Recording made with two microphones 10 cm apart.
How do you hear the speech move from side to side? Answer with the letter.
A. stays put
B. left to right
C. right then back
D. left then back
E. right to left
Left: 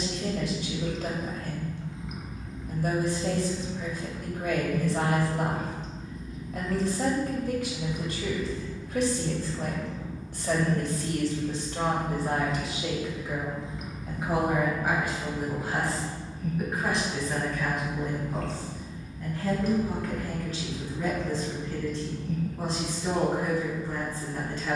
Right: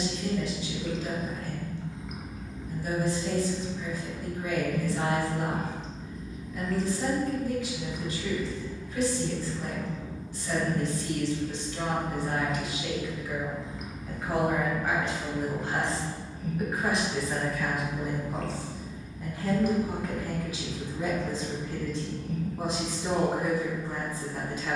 B.